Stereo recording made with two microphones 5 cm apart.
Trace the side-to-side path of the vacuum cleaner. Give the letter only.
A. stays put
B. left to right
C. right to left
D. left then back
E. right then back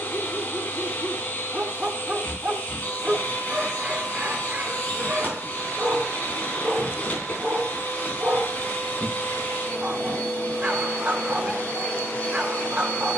A.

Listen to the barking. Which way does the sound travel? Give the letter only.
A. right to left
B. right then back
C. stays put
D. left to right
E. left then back
C.